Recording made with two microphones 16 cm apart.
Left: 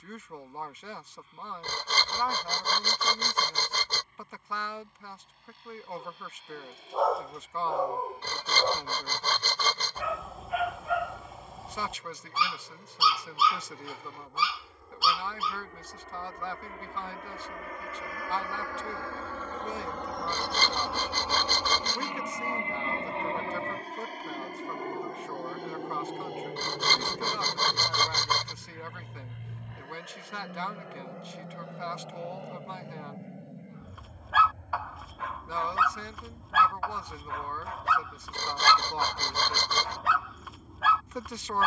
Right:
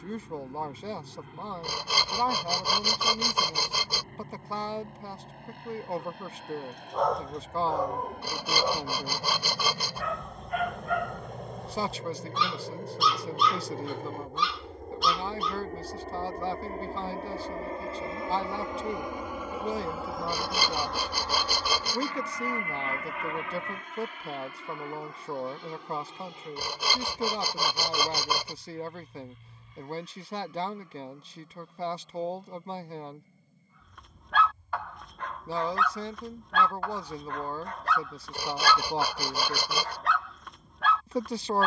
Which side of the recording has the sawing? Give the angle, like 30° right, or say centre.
10° right.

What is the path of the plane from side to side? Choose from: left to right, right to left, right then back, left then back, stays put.
right to left.